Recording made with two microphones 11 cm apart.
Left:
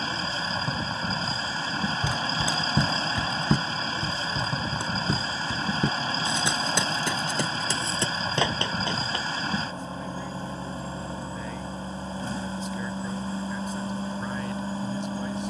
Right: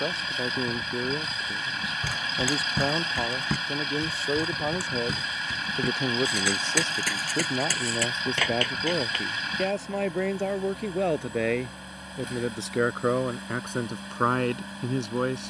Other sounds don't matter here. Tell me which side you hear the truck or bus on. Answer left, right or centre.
left.